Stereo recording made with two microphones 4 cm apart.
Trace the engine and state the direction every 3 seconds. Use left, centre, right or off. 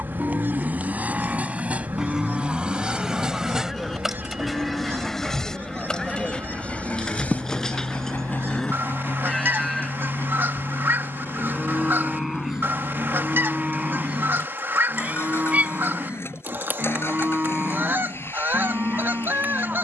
right, centre, left, left, left, left, left.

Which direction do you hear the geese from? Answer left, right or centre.
right.